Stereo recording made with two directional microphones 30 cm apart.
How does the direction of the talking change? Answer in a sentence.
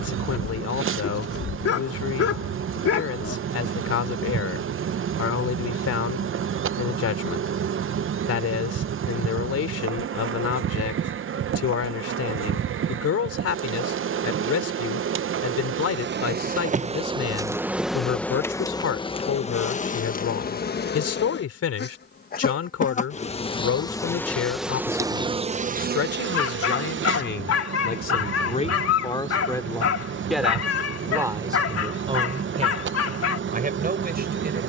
You can hear the talking go from the left side to the right.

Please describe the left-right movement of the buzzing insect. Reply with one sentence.
In this clip you hear the buzzing insect move from right to left and back again.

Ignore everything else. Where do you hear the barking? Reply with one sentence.
You can hear the barking on the left.